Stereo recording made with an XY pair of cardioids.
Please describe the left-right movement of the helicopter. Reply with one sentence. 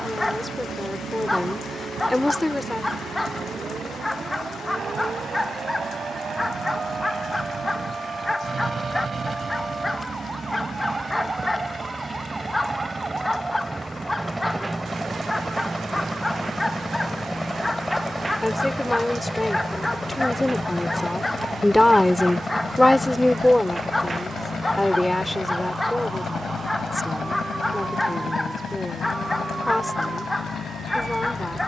You can hear the helicopter go from the right side to the left.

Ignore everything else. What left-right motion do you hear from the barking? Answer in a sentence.
In this clip you hear the barking stay put.